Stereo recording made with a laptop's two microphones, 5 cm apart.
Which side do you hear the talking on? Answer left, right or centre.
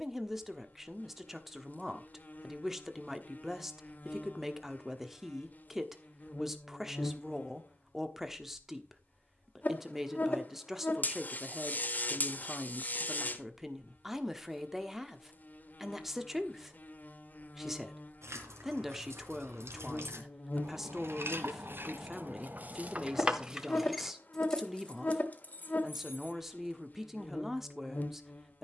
centre.